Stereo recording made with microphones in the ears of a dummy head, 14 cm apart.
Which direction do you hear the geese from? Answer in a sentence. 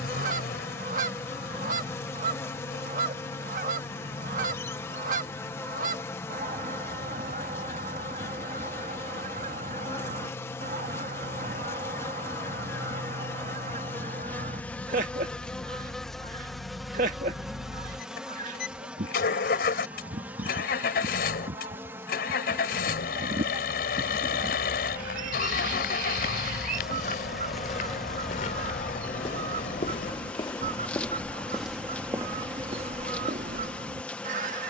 In this clip you hear the geese on the right.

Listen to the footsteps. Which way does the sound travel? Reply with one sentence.
You can hear the footsteps move from left to right.